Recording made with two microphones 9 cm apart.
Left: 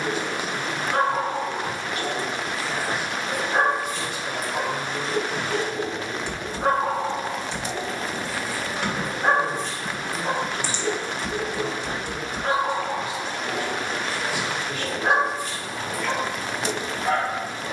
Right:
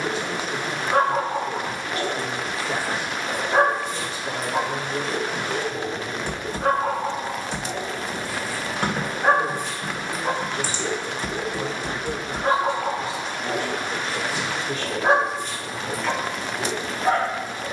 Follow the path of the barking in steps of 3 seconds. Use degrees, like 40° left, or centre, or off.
30° right, 30° right, centre, 20° right, 30° right, 30° right.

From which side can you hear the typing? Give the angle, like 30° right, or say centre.
40° right.